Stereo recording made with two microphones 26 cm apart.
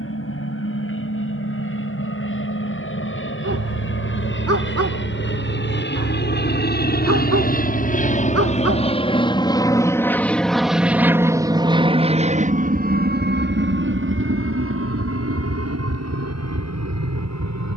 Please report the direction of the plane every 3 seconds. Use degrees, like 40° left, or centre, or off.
60° left, 50° left, 40° left, centre, 40° right, 60° right.